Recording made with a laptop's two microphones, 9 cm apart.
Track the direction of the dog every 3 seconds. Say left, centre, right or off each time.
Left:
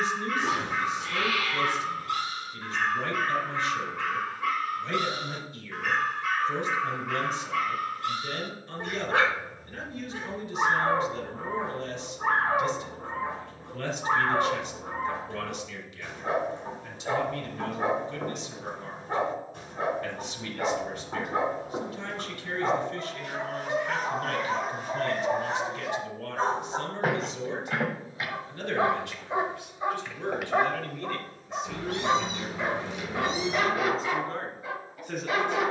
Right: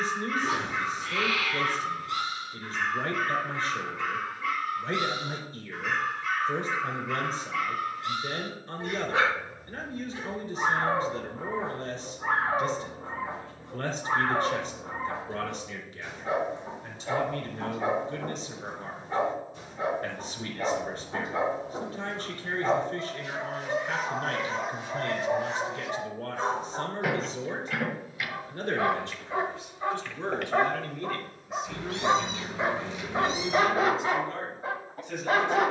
left, left, left, left, left, left, left, left, left, left, centre, right.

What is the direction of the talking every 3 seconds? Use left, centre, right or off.
right, right, right, right, right, right, right, right, right, right, centre, left.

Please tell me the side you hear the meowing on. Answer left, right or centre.
left.